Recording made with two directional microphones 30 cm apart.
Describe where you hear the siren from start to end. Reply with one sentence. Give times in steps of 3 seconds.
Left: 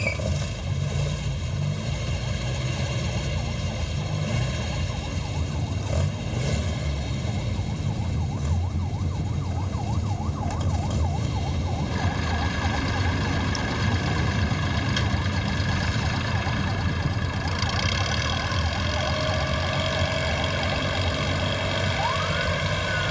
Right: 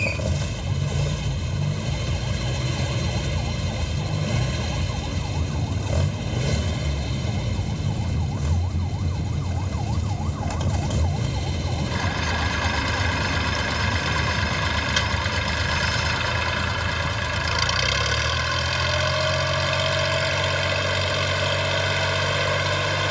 In this clip you hear the siren on the right from 0 s, in the centre from 12 s and on the left from 15 s.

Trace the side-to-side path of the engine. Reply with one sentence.
In this clip you hear the engine stay put.